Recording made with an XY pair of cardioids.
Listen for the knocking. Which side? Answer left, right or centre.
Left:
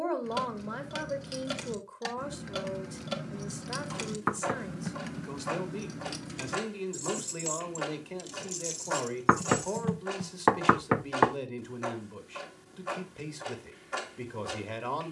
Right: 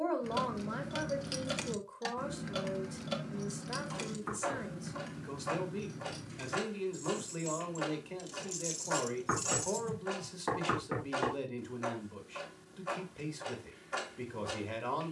left.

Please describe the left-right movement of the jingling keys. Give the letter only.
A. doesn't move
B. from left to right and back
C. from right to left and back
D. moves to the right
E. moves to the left
C.